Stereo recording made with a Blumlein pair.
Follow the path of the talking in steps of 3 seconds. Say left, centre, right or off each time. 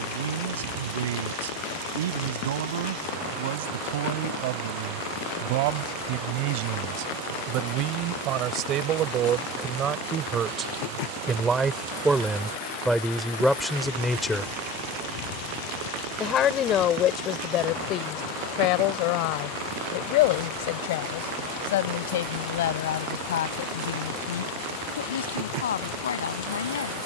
right, right, right, right, centre, left, left, left, left.